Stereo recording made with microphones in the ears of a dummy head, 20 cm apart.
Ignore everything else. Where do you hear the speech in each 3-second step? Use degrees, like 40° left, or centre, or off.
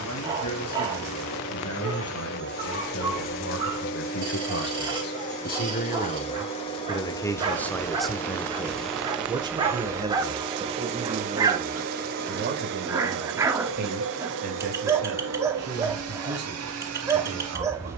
80° left, 60° left, 10° left, 30° right, 50° right, 50° right.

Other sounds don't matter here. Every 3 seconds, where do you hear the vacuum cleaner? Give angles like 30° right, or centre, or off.
50° left, 40° left, 20° left, 20° right, 60° right, 70° right.